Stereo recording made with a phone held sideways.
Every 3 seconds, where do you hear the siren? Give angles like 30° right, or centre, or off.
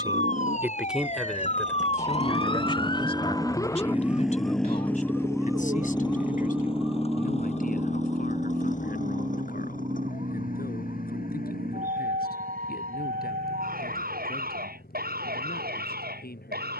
40° left, 10° left, 20° right, 40° right, 60° right, 60° right.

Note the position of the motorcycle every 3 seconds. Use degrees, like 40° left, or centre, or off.
50° right, centre, 40° left, 50° left, 60° left, 60° left.